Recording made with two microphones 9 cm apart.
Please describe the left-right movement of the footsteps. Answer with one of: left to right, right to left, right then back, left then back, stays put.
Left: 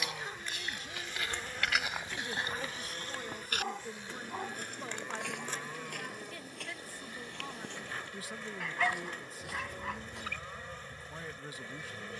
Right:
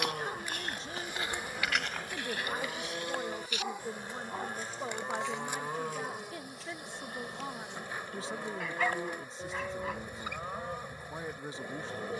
right to left.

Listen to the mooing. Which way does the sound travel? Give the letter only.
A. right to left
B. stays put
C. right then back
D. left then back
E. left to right
B.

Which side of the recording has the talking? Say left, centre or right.
right.